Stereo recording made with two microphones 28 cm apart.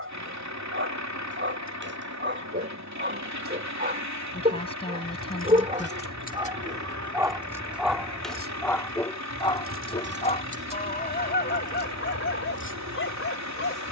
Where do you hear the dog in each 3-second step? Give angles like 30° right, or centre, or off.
40° right, 30° right, centre, 30° left, 50° left.